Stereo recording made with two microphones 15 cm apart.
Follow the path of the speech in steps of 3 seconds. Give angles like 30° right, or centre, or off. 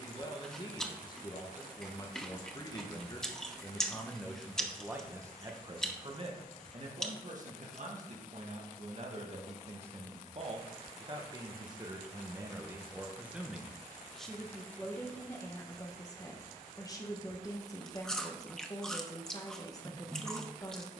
30° left, centre, 50° right, 40° right, 10° right, 20° left, 20° left.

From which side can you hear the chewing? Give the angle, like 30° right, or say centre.
centre.